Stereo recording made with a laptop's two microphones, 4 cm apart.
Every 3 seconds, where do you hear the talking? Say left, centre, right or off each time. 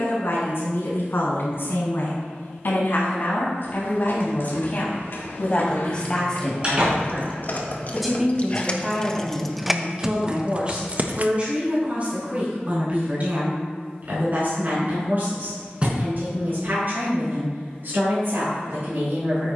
left, left, centre, right, right, right, right.